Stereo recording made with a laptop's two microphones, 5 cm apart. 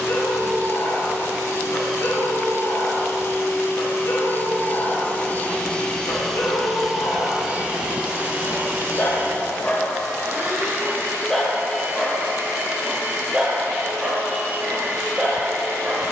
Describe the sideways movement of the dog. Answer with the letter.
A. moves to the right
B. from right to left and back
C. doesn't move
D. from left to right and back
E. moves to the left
A.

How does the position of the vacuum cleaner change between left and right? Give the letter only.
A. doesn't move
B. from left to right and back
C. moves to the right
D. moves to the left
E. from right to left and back
C.